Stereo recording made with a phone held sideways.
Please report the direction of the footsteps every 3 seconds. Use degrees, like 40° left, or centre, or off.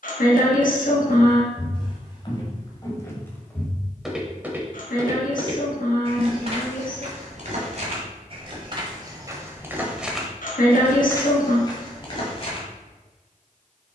40° left, 10° right, 50° right, 10° left, 40° left.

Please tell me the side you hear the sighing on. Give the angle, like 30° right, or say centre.
80° left.